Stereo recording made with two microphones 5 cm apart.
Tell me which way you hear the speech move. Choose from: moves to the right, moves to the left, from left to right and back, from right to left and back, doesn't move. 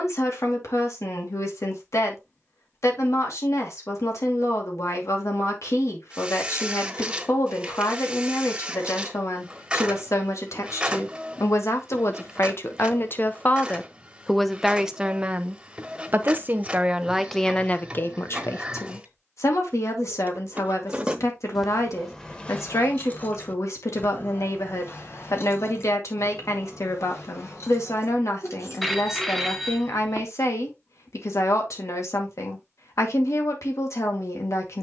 from left to right and back.